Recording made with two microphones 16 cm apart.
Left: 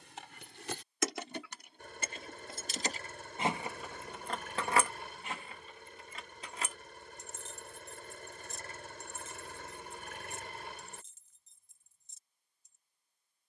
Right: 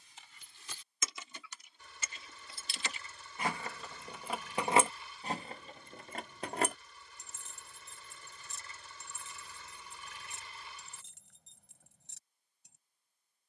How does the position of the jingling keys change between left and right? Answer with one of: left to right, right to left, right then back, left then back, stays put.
left to right.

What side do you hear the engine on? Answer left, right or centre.
left.